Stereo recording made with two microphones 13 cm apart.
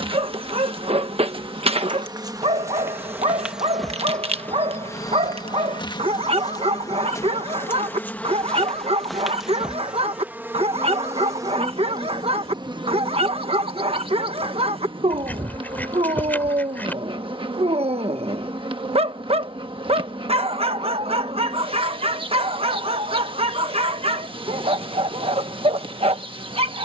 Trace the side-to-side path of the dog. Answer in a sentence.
You can hear the dog stay put.